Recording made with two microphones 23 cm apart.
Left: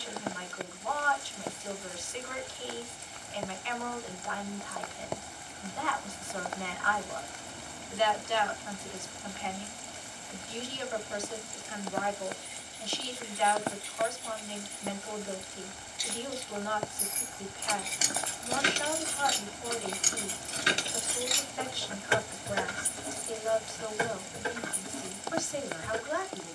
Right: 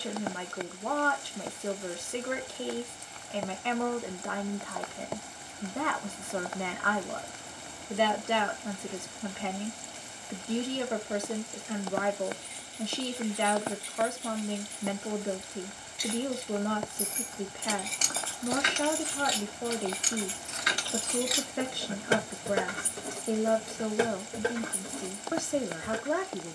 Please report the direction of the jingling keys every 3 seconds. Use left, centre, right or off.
off, off, off, off, right, right, left, right, right.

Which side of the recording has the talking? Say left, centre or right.
right.